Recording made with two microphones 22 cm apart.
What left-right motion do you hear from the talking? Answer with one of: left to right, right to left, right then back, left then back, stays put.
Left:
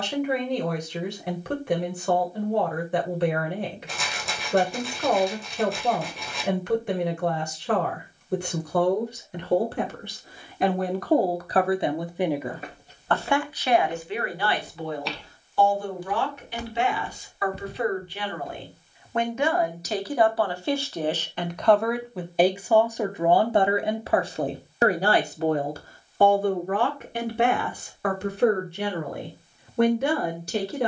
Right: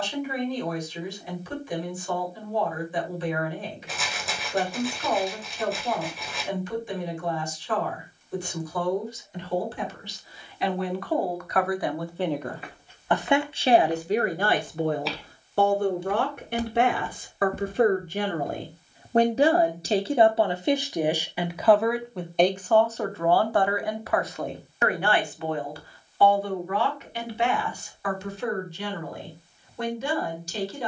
right then back.